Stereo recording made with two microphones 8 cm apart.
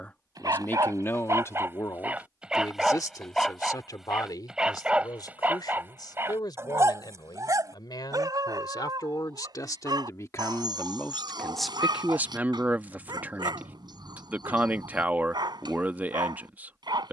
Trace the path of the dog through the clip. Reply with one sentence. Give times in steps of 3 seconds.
You can hear the dog on the right from 0 s, in the centre from 3 s and on the right from 6 s.